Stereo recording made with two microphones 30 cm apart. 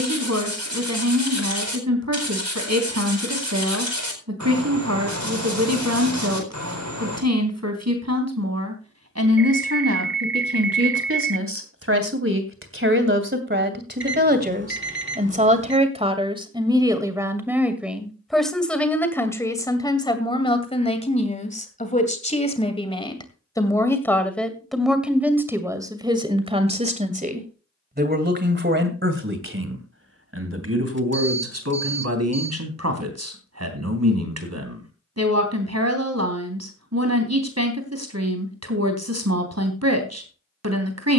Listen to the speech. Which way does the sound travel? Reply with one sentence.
In this clip you hear the speech move from right to left and back again.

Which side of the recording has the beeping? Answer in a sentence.
You can hear the beeping on the right.